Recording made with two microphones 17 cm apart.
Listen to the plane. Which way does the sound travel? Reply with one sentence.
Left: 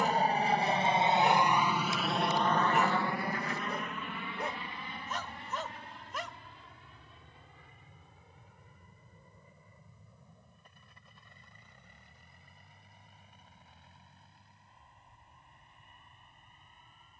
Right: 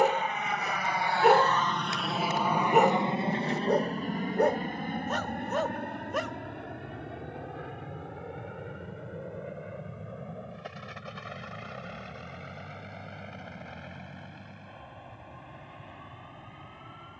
In this clip you hear the plane travel towards the right.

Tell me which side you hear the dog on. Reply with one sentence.
You can hear the dog on the right.